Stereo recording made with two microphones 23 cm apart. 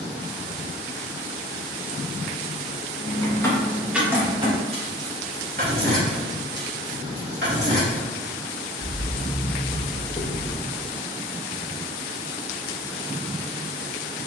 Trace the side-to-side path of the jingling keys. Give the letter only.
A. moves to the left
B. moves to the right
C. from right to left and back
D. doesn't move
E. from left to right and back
E.